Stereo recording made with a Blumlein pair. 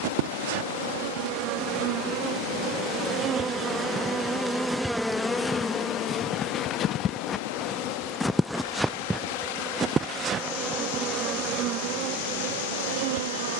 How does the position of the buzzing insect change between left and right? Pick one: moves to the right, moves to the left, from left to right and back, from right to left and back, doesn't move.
from right to left and back.